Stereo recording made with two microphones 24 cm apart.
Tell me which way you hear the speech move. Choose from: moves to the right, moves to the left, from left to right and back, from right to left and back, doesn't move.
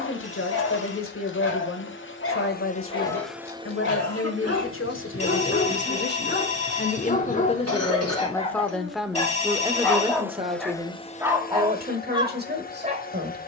moves to the right.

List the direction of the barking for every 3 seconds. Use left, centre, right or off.
left, left, left, centre, right.